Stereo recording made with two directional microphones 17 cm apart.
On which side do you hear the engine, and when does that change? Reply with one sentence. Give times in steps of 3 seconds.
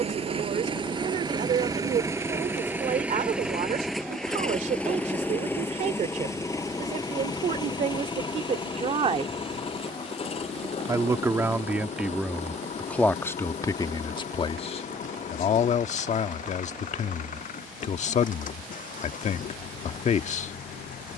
In this clip you hear the engine on the right from 0 s, in the centre from 3 s and on the left from 6 s.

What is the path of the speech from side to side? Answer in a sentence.
You can hear the speech move from right to left.